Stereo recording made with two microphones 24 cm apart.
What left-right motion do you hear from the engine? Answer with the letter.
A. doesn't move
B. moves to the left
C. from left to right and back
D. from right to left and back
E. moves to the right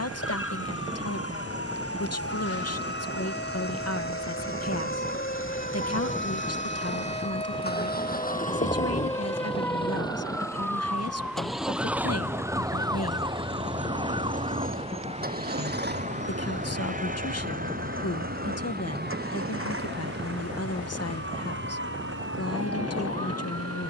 E.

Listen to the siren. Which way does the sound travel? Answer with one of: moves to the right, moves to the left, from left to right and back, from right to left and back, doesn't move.
moves to the right.